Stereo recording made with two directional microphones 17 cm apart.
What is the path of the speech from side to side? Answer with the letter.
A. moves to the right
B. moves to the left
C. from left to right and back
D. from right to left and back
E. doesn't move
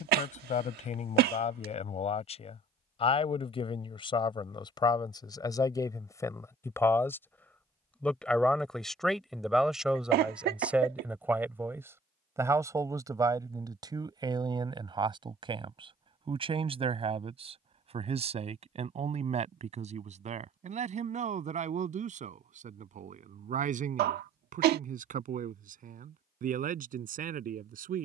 A.